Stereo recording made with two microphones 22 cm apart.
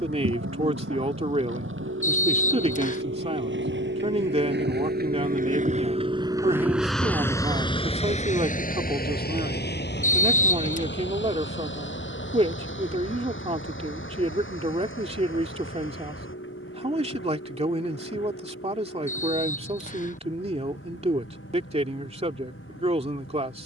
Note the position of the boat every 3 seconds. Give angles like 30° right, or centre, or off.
80° right, 50° right, 10° left, 60° left, 70° left, 70° left, 80° left, 80° left.